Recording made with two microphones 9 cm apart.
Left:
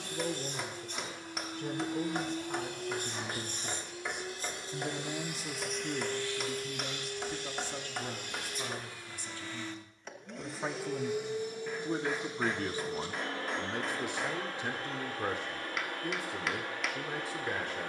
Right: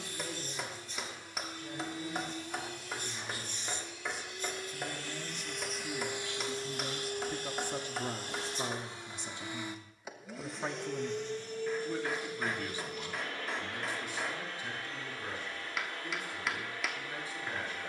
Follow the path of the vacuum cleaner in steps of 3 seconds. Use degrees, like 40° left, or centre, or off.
50° left, 30° left, 30° right, centre, 30° left, 50° left.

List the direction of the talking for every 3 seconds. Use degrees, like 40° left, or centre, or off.
70° left, 50° left, 10° right, centre, 50° left, 70° left.